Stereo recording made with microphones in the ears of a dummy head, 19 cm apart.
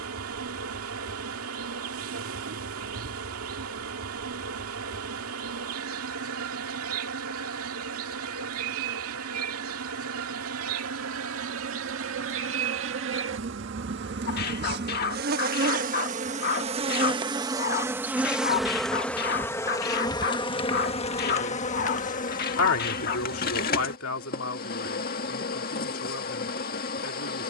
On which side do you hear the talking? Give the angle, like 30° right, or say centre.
70° left.